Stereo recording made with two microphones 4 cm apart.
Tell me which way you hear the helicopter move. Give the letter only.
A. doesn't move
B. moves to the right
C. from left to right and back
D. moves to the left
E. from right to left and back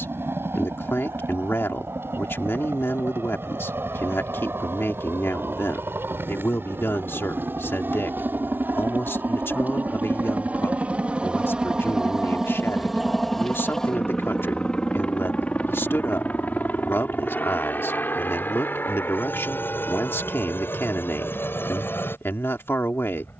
D.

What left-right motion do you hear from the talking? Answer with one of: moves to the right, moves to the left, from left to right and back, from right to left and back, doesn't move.
doesn't move.